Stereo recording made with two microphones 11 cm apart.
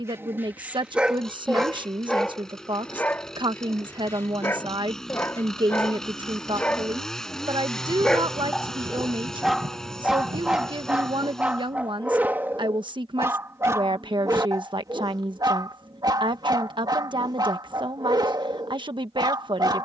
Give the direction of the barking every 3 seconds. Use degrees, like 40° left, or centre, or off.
10° right, 20° left, 10° left, 10° right, 20° right, 40° right, 40° right.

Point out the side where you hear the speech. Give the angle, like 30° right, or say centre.
40° right.